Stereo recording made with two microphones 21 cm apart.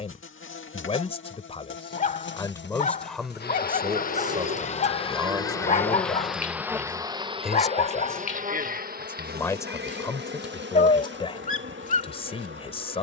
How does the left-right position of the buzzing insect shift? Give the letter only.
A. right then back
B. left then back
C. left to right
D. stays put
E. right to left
C.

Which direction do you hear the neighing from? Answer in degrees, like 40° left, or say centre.
70° right.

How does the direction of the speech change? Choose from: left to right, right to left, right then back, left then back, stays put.
right then back.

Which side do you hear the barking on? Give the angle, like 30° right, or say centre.
40° left.